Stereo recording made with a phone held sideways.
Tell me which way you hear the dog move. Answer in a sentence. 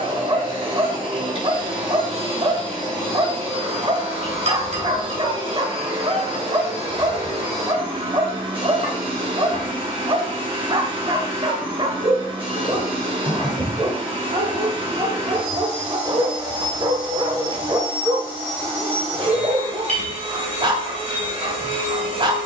You can hear the dog stay in one place.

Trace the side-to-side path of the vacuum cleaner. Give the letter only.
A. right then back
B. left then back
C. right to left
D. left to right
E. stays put
E.